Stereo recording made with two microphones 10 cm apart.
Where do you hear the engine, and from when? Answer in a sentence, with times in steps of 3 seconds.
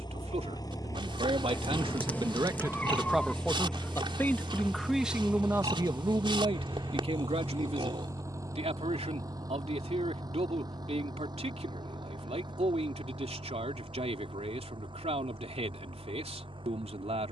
In this clip you hear the engine on the left from 0 s, in the centre from 3 s and on the right from 6 s.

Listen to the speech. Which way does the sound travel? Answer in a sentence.
In this clip you hear the speech move from right to left and back again.